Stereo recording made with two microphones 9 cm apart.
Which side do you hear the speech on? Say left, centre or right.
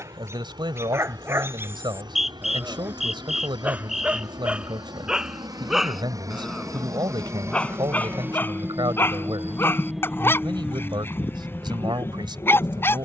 right.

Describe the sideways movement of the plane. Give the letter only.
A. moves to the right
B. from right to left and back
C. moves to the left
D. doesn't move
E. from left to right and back
C.